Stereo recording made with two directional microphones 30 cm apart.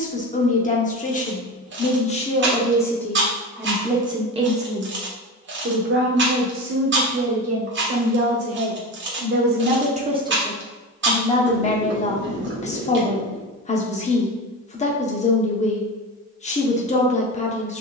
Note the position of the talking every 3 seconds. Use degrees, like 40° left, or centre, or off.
20° left, 20° right, 50° right, 10° right, 20° left, 20° left.